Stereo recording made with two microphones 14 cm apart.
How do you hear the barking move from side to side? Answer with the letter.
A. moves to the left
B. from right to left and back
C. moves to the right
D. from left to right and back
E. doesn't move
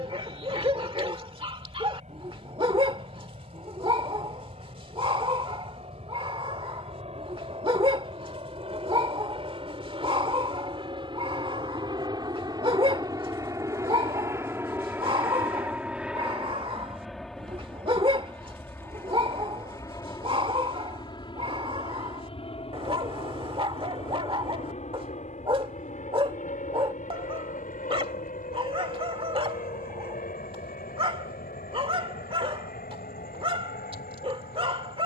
E.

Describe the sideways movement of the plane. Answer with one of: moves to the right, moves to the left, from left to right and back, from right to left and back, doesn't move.
moves to the left.